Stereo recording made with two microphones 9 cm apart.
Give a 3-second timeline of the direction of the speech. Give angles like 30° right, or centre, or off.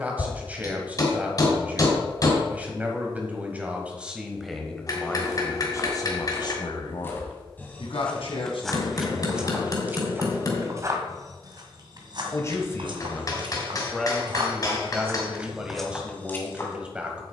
20° right, centre, 60° left, 70° left, 10° left, 10° right.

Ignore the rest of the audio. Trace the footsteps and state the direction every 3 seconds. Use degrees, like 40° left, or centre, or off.
off, 40° left, 20° left, 30° right, 60° right, centre.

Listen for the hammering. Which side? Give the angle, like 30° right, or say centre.
40° left.